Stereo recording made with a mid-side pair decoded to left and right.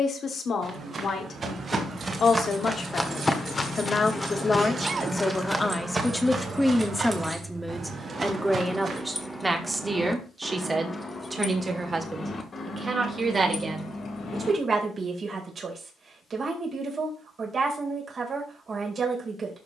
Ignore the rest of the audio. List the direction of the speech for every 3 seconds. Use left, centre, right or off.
left, left, centre, right, right, right, right.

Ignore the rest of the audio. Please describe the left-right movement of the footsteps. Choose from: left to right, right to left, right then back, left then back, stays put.
left then back.